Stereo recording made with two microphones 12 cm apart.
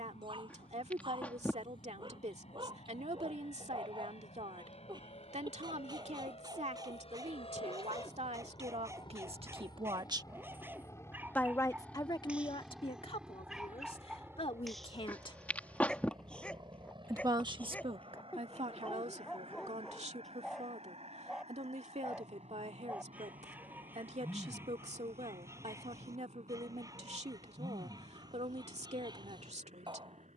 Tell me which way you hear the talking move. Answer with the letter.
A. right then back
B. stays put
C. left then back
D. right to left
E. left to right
C.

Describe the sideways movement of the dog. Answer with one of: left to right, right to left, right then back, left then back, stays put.
left then back.